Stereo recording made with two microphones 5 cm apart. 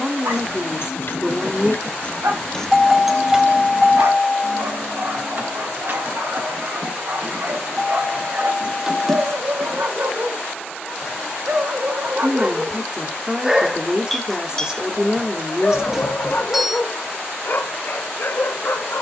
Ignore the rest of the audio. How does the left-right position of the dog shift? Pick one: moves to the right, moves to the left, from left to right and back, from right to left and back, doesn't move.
moves to the left.